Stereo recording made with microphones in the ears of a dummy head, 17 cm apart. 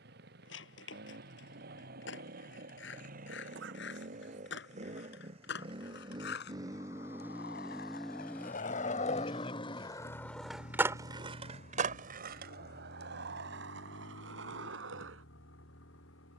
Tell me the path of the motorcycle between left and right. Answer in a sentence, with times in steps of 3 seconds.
You can hear the motorcycle on the right from 0 s, in the centre from 6 s and on the left from 9 s.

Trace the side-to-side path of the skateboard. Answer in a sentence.
You can hear the skateboard move to the right.